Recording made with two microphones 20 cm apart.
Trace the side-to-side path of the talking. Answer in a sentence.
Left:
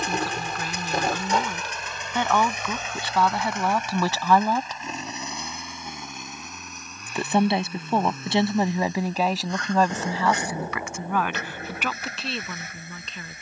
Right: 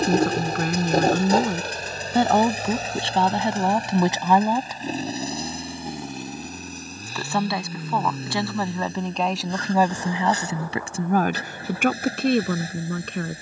You can hear the talking move from right to left and back again.